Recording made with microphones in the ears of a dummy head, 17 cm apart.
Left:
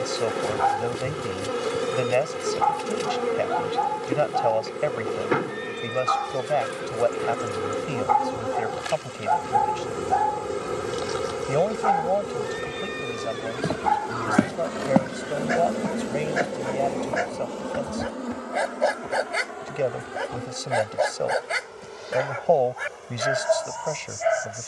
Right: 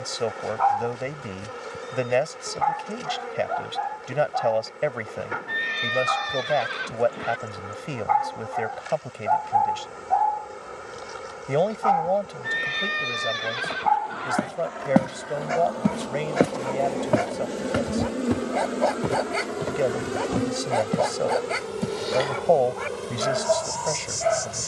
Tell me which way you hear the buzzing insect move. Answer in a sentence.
You can hear the buzzing insect move from left to right.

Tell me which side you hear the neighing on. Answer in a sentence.
You can hear the neighing on the right.